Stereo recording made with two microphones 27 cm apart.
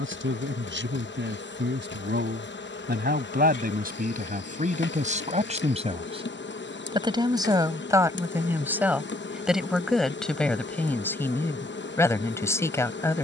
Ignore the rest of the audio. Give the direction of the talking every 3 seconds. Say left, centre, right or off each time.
right, right, centre, centre, centre.